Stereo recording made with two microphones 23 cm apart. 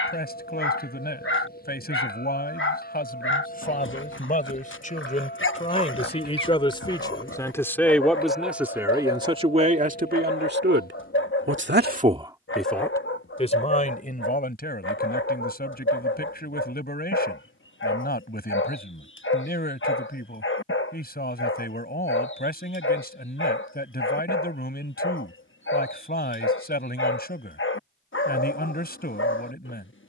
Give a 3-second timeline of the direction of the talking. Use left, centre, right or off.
left, left, centre, right, left, left, left, left, left, left.